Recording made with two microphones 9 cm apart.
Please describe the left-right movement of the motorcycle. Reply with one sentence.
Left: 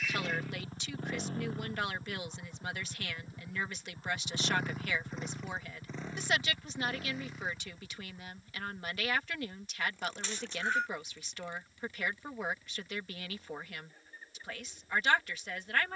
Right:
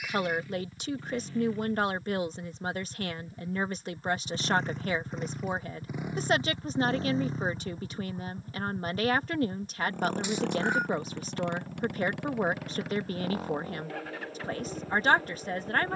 You can hear the motorcycle travel towards the right.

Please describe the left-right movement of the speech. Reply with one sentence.
You can hear the speech stay put.